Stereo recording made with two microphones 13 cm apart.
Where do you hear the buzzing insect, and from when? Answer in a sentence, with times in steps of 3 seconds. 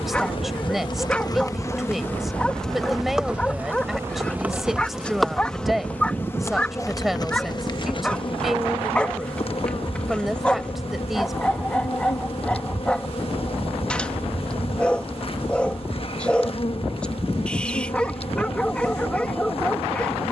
In this clip you hear the buzzing insect on the left from 0 s, in the centre from 3 s and on the left from 6 s.